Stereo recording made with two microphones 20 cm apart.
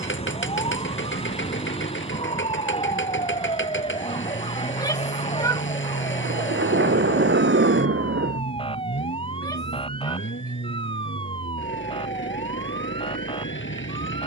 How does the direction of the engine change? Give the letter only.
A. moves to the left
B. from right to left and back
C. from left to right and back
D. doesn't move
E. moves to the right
D.